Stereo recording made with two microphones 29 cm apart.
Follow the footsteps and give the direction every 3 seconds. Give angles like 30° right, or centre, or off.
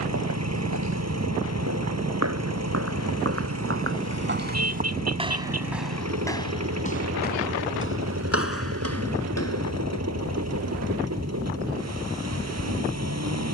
60° right, 30° right, 40° left, 60° left, off.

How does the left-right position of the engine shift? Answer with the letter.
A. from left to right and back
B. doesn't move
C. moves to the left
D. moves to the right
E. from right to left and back
B.